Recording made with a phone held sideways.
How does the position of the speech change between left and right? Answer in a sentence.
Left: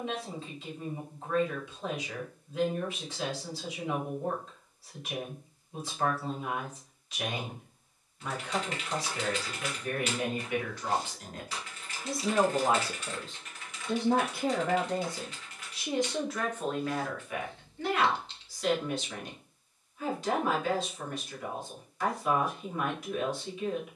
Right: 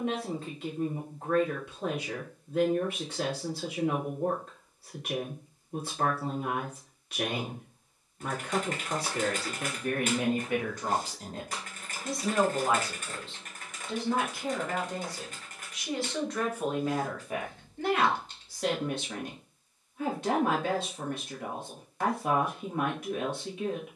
In this clip you hear the speech go left and come back.